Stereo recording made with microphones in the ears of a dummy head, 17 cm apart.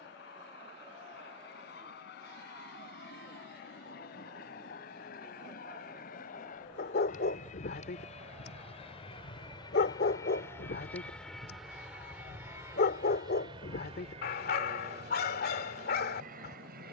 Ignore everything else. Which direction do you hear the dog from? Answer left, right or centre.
left.